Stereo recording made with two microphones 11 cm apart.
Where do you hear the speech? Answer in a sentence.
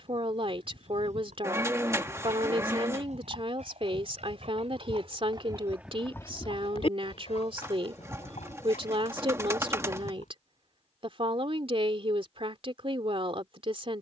In this clip you hear the speech on the right.